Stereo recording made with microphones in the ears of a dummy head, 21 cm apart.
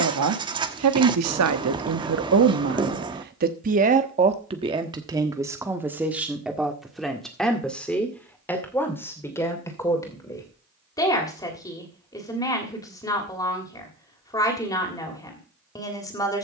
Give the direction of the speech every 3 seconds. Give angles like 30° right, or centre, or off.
70° right, 20° right, centre, 10° left, 20° left, 20° left.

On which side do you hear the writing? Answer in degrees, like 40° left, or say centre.
20° right.